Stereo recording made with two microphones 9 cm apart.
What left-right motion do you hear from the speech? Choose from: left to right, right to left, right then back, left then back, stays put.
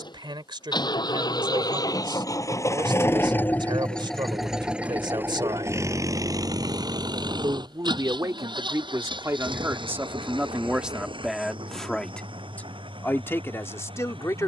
right to left.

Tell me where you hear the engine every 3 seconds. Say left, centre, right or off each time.
left, centre, right, right, right.